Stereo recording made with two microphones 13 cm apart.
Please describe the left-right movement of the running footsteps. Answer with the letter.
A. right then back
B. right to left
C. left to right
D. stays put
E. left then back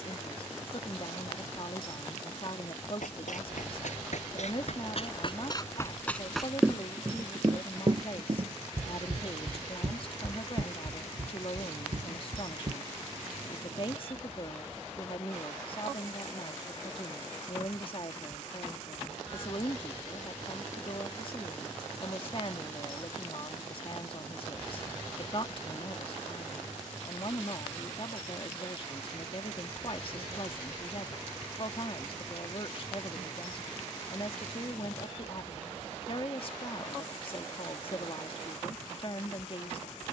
C.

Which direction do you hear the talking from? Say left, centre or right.
left.